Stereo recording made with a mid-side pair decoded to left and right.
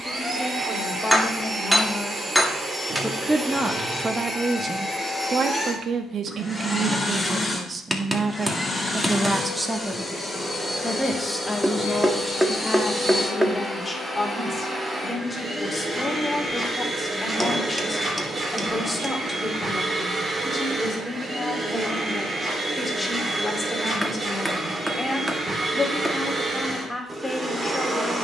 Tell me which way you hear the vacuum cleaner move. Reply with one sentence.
In this clip you hear the vacuum cleaner move from right to left and back again.